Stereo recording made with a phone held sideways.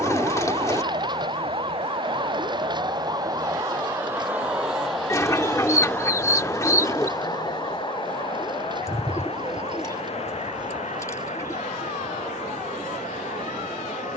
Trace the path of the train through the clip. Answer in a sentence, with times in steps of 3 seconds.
In this clip you hear the train on the right from 0 s, in the centre from 3 s and on the left from 6 s.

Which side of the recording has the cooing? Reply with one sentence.
You can hear the cooing on the left.